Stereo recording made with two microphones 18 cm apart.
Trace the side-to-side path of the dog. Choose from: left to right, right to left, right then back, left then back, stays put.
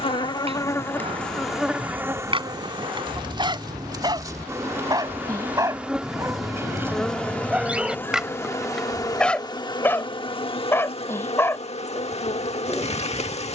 right to left.